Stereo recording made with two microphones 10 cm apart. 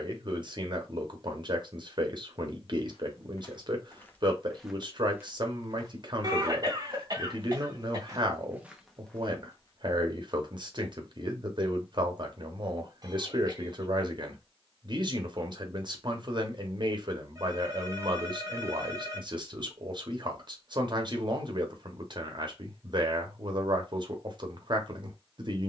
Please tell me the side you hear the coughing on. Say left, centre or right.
right.